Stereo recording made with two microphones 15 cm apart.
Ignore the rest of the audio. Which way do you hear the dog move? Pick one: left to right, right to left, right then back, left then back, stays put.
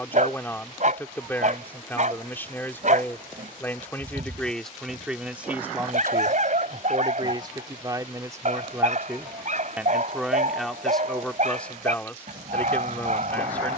stays put.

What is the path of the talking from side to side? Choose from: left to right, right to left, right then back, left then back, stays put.
right then back.